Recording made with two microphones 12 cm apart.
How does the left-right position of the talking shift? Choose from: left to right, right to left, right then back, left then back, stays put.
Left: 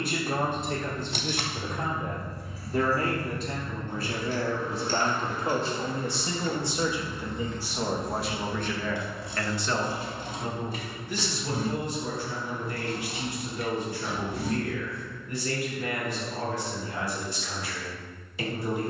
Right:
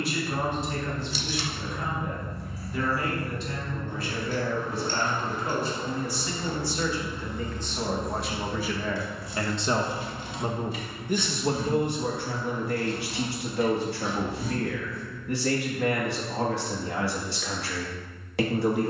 left to right.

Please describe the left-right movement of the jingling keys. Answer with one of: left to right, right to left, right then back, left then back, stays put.
right to left.